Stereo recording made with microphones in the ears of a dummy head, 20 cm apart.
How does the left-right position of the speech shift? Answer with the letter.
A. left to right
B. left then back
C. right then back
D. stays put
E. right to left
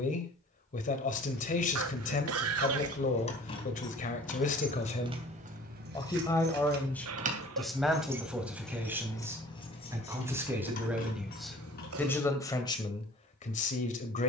C.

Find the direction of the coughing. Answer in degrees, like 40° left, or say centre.
70° right.